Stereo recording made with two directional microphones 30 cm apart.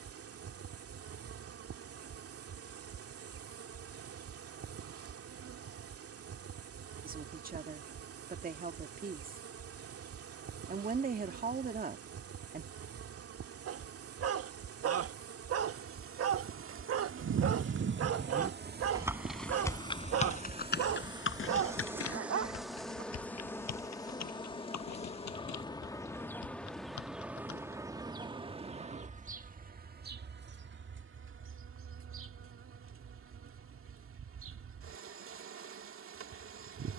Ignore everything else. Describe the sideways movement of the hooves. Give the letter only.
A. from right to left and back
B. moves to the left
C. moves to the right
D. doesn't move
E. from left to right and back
B.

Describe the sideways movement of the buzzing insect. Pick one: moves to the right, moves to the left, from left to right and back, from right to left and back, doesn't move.
from right to left and back.